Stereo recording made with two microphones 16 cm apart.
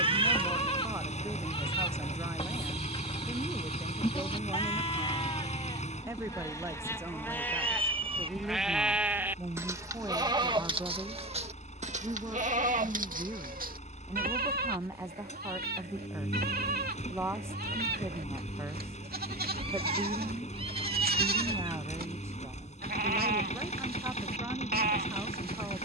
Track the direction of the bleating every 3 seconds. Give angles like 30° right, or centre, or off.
30° left, 30° left, 10° left, 30° right, 60° right, 70° right, 70° right, 70° right, 70° right.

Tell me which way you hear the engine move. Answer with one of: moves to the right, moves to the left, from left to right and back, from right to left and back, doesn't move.
doesn't move.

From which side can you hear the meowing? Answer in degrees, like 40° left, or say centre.
30° right.